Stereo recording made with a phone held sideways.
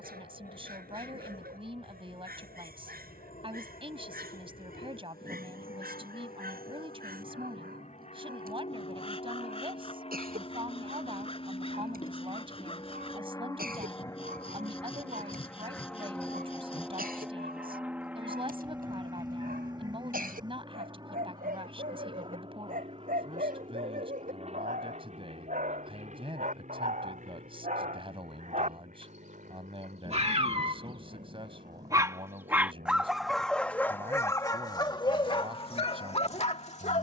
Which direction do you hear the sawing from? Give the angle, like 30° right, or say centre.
40° left.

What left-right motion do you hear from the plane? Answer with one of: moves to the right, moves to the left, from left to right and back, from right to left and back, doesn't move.
moves to the right.